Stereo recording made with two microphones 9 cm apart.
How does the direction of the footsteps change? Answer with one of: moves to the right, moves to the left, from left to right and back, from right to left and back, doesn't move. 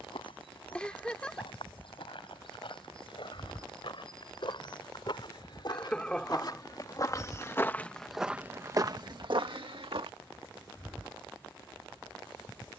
moves to the right.